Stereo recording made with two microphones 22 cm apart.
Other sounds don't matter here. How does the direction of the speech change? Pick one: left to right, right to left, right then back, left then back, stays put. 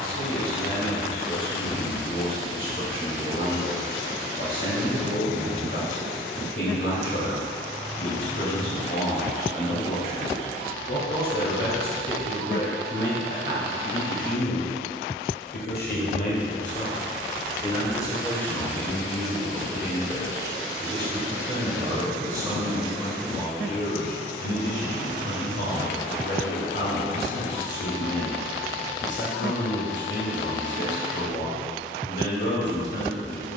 right then back.